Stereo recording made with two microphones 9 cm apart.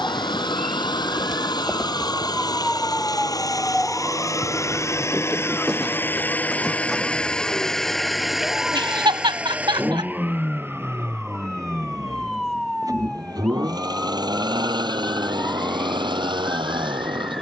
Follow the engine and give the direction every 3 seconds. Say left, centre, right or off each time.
left, left, centre, right, right, right.